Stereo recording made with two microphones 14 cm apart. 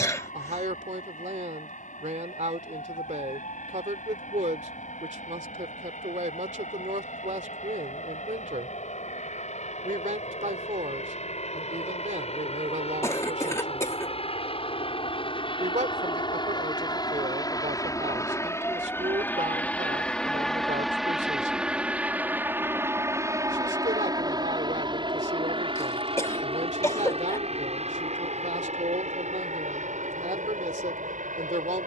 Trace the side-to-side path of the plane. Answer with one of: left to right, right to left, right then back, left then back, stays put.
left to right.